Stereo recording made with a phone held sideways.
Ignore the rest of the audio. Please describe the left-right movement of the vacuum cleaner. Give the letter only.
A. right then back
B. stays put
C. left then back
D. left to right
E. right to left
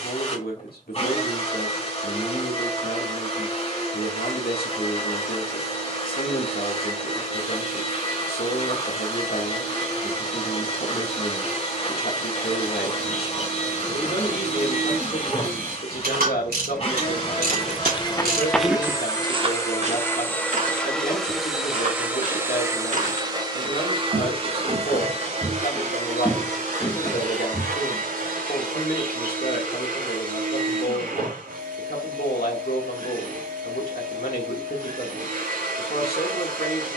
D.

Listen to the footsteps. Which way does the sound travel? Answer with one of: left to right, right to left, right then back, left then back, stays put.
right then back.